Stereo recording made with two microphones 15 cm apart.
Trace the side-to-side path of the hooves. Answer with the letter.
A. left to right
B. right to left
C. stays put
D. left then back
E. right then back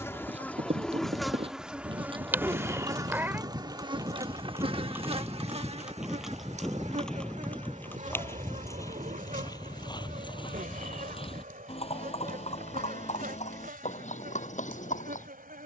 B.